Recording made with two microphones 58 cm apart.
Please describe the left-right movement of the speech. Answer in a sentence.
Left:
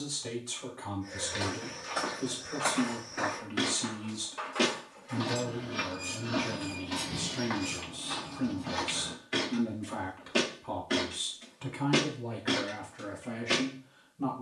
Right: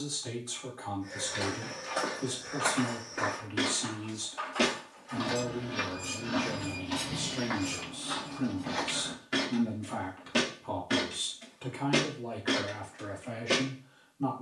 You can hear the speech go right and come back.